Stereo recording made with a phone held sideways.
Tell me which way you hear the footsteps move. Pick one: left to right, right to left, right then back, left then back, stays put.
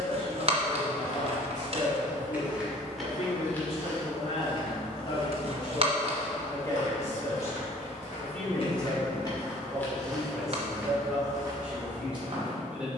left then back.